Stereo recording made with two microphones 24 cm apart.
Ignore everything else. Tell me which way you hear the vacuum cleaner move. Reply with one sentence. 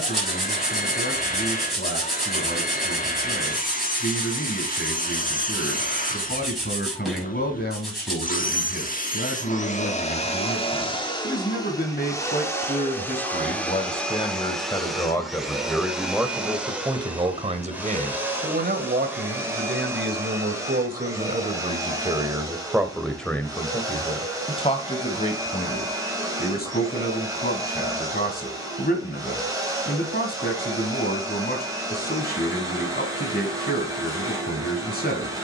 In this clip you hear the vacuum cleaner move to the right.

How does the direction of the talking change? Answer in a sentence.
You can hear the talking go right and come back.